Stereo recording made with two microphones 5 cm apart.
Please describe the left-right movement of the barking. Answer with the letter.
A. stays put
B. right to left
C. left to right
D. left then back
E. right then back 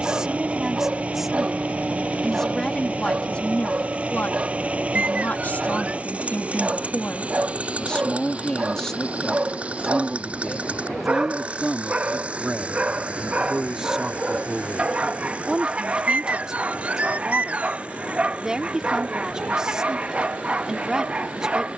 A.